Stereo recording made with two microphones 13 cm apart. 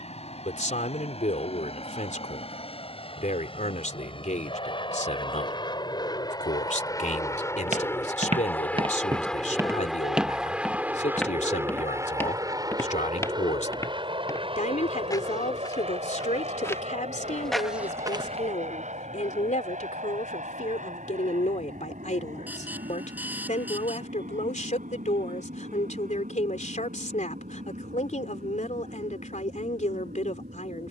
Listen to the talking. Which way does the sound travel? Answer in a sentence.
You can hear the talking stay put.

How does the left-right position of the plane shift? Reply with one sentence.
You can hear the plane travel towards the right.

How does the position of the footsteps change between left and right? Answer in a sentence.
In this clip you hear the footsteps move from right to left and back again.